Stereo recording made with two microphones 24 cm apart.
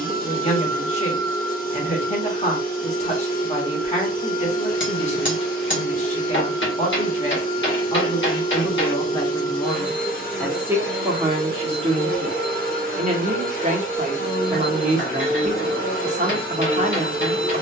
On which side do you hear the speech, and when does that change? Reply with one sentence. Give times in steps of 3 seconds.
You can hear the speech on the left from 0 s, in the centre from 9 s and on the right from 12 s.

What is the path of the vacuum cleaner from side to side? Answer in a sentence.
You can hear the vacuum cleaner stay in one place.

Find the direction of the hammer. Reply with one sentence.
In this clip you hear the hammer on the left.